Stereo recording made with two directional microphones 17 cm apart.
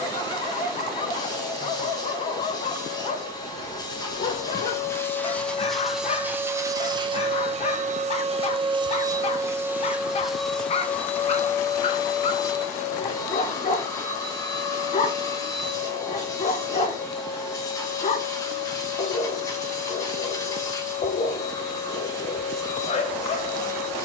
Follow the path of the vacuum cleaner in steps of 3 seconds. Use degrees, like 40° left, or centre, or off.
20° left, 20° left, 30° right, centre, 20° left, 20° left, 20° left, 20° left.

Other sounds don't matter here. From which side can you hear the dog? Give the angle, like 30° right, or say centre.
40° left.